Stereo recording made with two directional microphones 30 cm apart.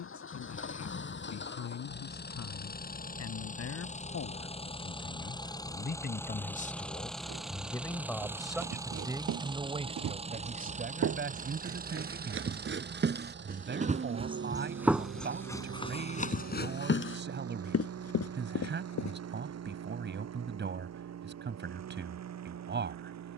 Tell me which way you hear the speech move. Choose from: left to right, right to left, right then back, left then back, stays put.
left to right.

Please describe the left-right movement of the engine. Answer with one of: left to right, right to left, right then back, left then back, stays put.
left to right.